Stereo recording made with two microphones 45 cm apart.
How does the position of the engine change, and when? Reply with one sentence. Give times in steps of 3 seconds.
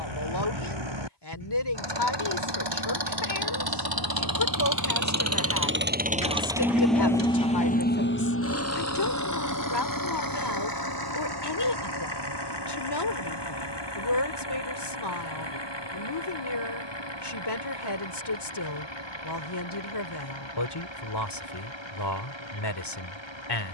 In this clip you hear the engine on the right from 0 s, in the centre from 6 s and on the left from 9 s.